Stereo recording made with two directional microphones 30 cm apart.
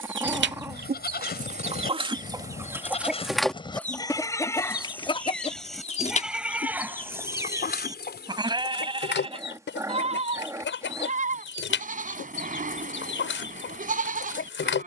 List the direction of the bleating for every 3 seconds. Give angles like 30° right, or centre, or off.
30° left, 10° left, 10° right, 20° right, 30° right.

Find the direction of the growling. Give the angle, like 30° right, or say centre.
10° right.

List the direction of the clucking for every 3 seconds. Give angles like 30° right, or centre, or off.
30° right, 10° left, 30° left, 40° left, 40° left.